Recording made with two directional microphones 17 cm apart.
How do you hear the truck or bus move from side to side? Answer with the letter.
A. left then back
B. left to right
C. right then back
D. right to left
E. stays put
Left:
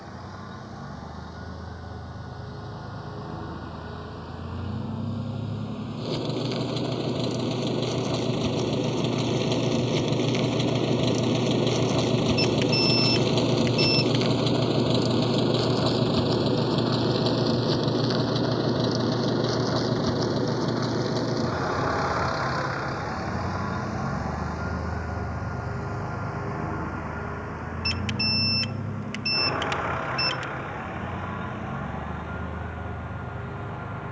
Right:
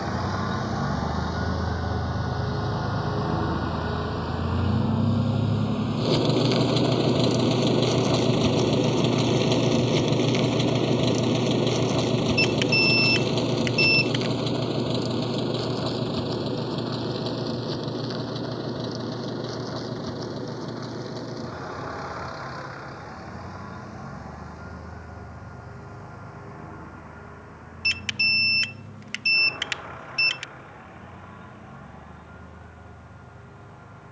D.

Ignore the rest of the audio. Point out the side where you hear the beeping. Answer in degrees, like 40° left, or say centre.
20° right.